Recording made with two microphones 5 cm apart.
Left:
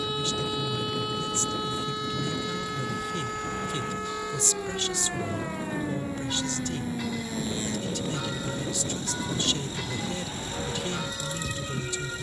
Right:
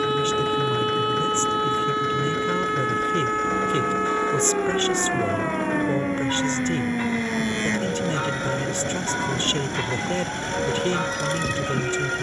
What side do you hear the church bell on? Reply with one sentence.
You can hear the church bell on the right.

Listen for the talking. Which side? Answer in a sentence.
In this clip you hear the talking on the right.